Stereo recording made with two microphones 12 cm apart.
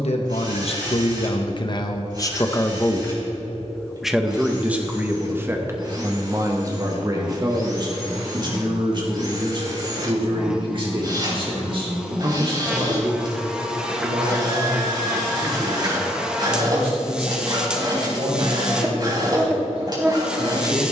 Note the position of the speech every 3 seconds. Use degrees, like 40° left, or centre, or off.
40° left, 10° right, 30° right, 40° right, 50° right, 50° right, 60° right.